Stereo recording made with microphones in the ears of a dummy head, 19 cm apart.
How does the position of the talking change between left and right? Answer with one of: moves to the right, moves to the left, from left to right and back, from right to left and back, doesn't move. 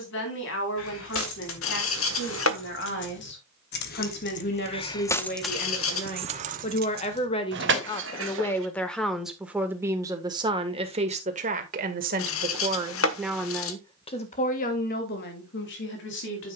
from left to right and back.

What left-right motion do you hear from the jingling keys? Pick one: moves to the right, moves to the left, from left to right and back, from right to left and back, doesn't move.
moves to the right.